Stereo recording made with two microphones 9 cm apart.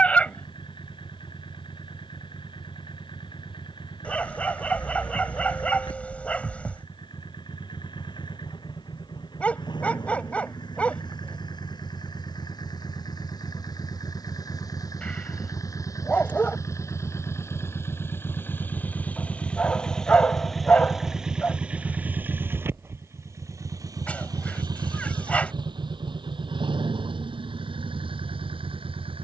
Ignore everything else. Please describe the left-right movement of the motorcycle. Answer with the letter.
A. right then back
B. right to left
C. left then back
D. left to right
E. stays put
D.